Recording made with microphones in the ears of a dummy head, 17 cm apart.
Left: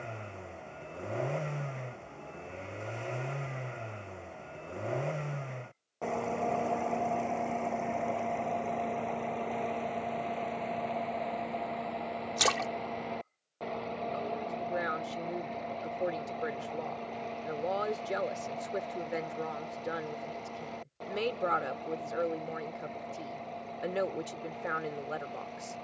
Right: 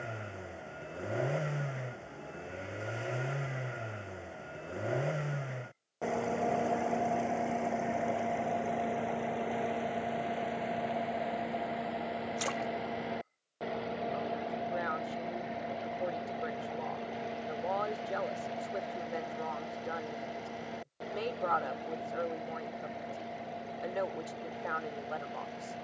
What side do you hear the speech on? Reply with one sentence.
In this clip you hear the speech on the left.